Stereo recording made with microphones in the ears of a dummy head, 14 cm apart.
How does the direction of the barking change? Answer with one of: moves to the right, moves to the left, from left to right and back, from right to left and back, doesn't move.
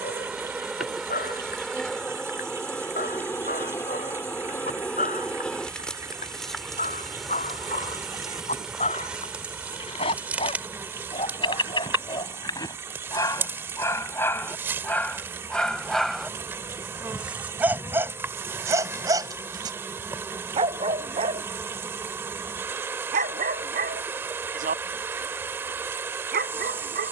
moves to the right.